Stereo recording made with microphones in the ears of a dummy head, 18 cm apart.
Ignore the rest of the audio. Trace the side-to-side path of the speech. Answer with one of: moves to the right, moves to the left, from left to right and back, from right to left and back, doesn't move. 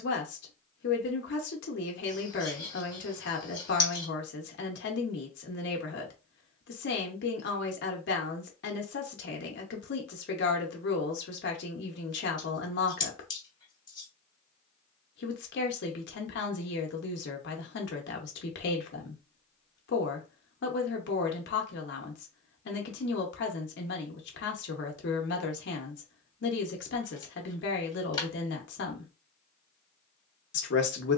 doesn't move.